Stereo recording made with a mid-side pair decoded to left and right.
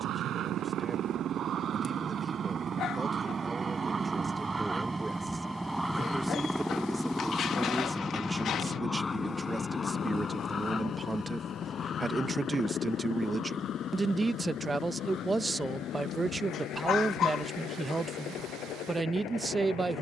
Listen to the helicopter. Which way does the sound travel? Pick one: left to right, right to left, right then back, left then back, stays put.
right to left.